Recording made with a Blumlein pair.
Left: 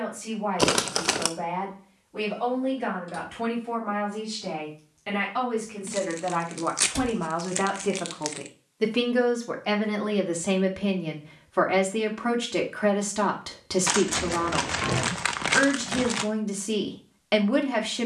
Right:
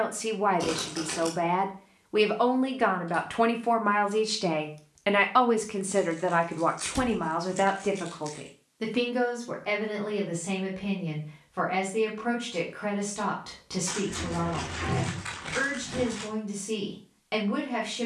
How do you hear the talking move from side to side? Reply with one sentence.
You can hear the talking travel towards the left.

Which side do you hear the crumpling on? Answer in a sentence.
In this clip you hear the crumpling on the left.